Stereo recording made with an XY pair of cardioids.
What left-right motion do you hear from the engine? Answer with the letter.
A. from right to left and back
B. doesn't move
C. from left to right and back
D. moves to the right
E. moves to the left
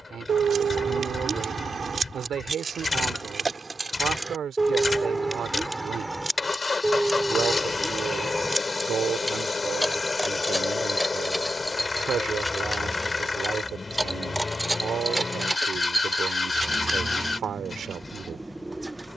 B.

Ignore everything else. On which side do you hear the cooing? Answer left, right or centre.
centre.